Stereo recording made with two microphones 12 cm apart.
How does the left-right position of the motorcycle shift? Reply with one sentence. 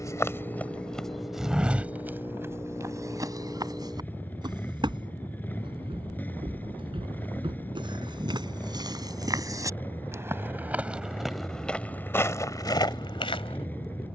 You can hear the motorcycle stay put.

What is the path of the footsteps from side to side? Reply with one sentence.
You can hear the footsteps move from left to right and back again.